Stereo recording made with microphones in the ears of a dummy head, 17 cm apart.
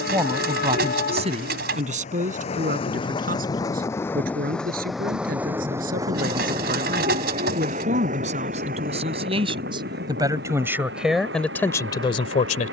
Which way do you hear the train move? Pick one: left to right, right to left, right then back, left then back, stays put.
left to right.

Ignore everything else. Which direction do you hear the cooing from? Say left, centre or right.
right.